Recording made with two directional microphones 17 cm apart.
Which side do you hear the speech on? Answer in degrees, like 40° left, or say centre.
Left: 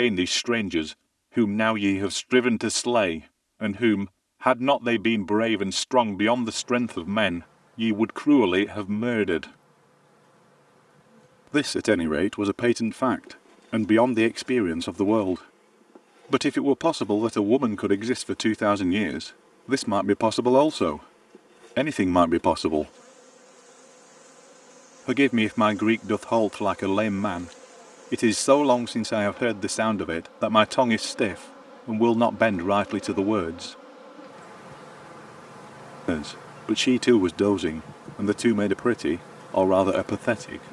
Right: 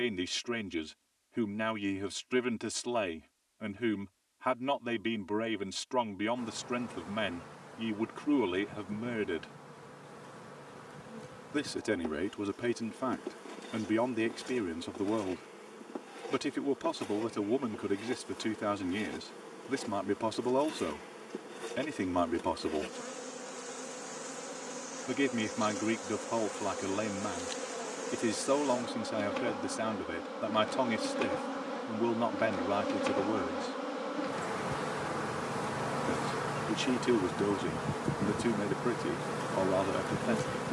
60° left.